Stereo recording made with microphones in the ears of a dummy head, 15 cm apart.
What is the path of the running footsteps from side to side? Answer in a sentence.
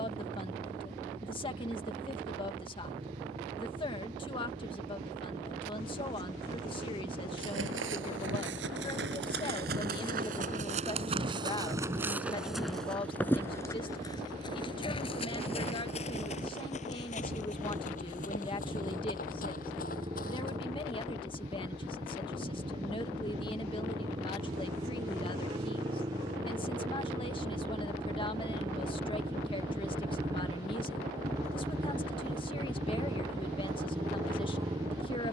In this clip you hear the running footsteps move from right to left.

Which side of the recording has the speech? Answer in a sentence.
In this clip you hear the speech on the left.